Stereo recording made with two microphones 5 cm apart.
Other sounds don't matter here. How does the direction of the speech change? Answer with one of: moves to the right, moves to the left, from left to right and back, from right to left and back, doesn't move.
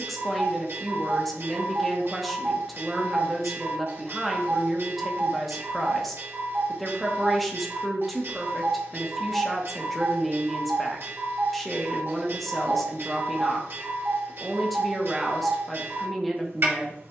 doesn't move.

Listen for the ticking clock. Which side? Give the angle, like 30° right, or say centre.
50° right.